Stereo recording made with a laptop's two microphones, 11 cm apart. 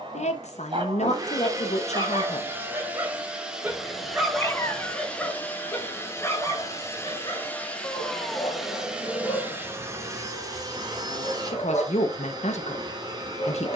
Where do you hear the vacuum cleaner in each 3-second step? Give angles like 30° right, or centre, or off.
30° right, centre, 10° left, 30° right, 40° right.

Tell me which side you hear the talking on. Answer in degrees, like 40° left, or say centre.
80° left.